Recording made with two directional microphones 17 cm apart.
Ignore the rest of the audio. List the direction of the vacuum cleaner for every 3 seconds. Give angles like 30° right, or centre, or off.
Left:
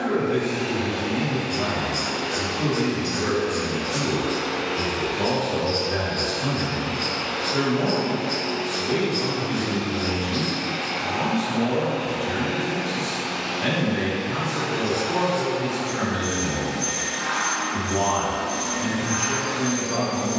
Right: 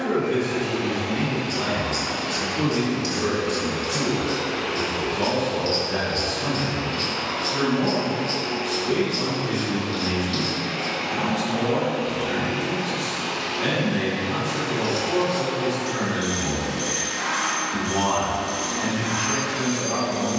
70° left, 70° left, 60° left, 30° left, 20° right, 30° right, 30° right.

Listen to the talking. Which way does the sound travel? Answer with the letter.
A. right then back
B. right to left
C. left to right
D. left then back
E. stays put
D.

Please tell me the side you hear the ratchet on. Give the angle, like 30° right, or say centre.
50° right.